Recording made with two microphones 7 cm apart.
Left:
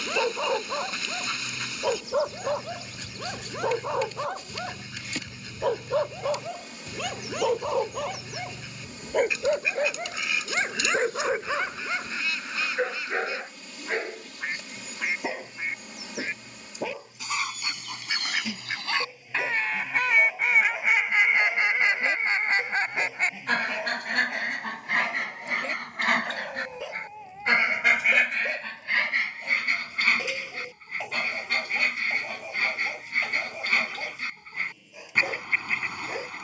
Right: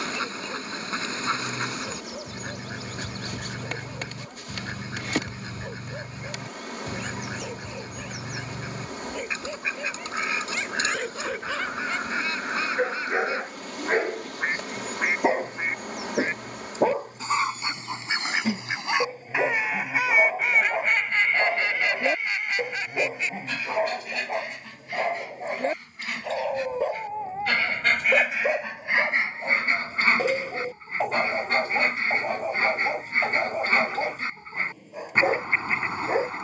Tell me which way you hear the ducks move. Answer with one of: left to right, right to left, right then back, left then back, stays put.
left then back.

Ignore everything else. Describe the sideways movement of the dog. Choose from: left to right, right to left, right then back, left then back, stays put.
left to right.